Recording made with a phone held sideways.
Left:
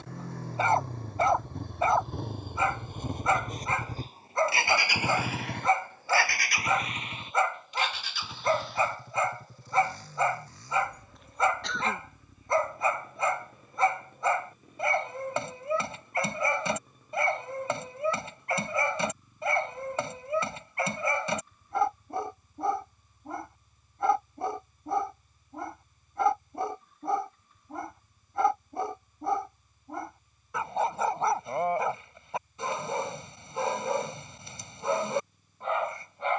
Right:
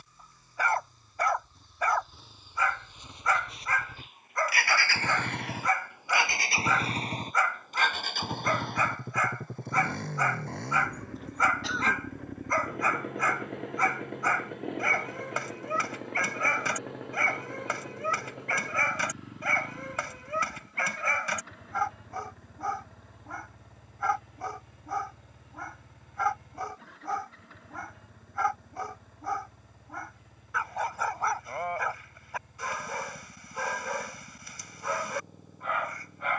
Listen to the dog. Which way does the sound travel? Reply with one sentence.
You can hear the dog stay in one place.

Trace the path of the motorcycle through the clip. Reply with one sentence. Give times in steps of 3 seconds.
You can hear the motorcycle on the left from 0 s and on the right from 6 s.